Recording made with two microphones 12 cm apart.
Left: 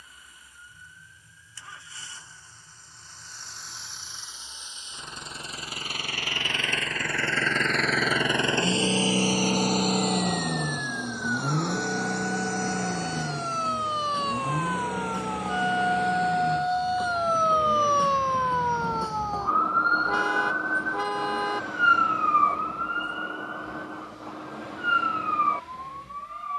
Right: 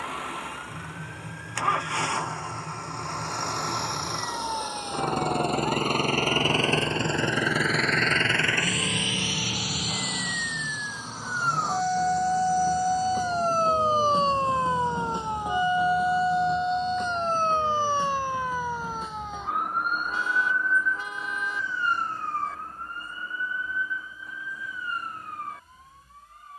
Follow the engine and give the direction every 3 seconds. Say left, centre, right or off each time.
right, right, centre, left, left, left, left, left, left.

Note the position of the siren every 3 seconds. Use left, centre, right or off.
right, right, right, right, right, centre, left, left, left.